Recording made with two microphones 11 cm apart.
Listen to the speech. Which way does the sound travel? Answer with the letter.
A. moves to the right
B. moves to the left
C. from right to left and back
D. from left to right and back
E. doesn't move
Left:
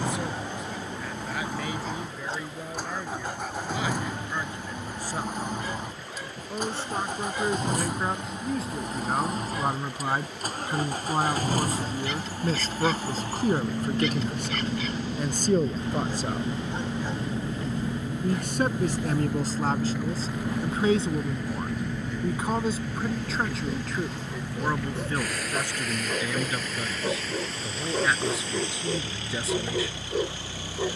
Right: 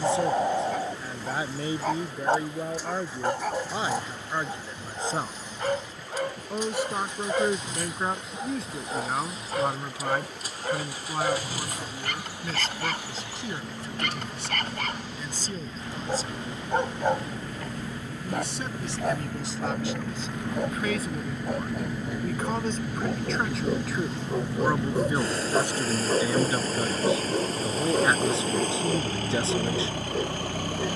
C.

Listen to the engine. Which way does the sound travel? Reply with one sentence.
You can hear the engine travel towards the right.